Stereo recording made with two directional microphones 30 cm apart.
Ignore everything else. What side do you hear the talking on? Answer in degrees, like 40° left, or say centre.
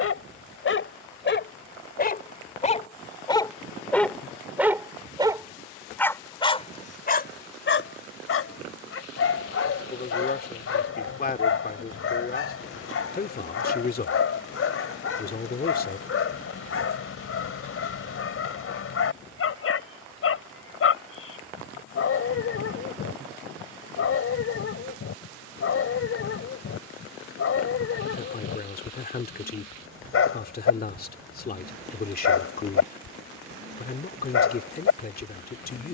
30° left.